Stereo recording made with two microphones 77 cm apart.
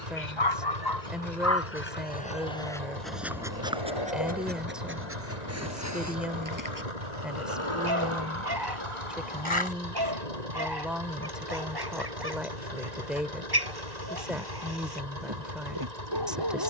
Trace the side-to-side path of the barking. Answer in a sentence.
In this clip you hear the barking travel towards the right.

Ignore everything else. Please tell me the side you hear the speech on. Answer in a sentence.
In this clip you hear the speech in the centre.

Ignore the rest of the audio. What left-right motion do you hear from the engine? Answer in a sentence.
In this clip you hear the engine stay in one place.